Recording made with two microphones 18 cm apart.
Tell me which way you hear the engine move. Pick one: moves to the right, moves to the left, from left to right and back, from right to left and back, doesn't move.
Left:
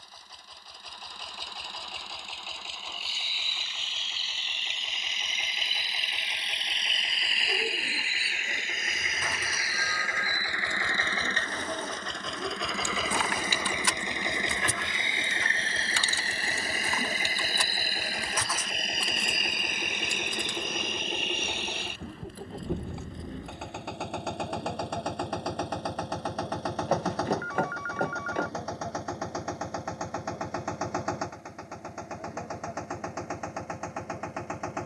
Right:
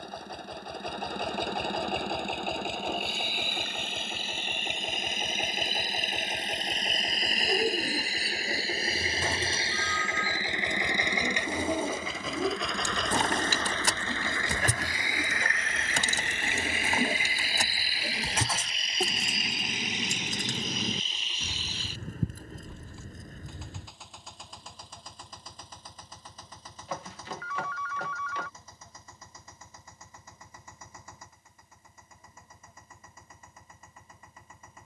moves to the left.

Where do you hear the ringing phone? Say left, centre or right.
left.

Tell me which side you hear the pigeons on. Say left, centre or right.
right.